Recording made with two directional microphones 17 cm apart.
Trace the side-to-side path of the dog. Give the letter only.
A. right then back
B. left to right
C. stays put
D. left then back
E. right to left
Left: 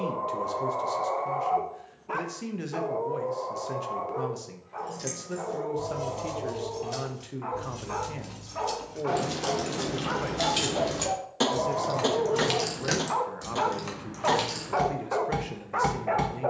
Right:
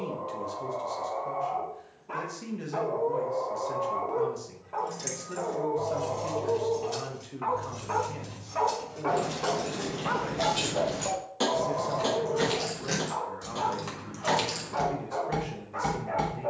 A.